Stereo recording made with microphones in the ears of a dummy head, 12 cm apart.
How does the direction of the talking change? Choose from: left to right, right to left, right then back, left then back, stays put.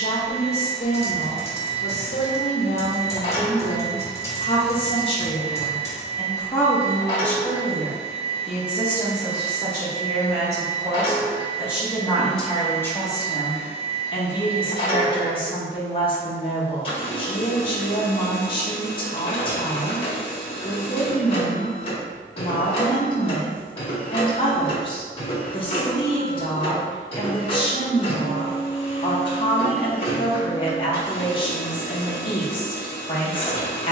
right then back.